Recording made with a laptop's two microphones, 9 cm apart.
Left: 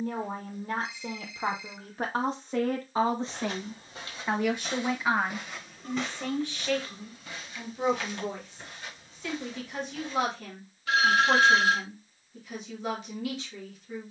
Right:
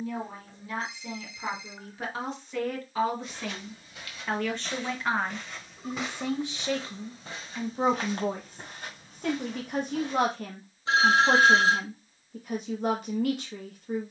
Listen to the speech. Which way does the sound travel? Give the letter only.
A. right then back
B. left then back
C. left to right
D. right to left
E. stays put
C.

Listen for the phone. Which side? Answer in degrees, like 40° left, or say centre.
30° right.